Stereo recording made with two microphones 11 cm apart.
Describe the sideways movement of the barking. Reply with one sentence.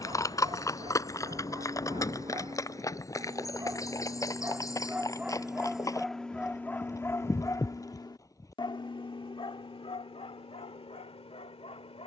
In this clip you hear the barking move to the left.